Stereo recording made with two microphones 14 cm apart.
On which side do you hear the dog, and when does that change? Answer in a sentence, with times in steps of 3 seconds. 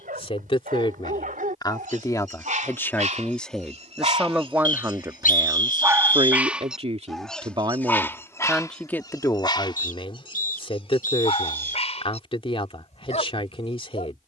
You can hear the dog on the right from 0 s, in the centre from 6 s and on the left from 9 s.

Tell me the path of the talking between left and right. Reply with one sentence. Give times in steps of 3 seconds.
You can hear the talking on the left from 0 s, in the centre from 3 s, on the right from 6 s and on the left from 9 s.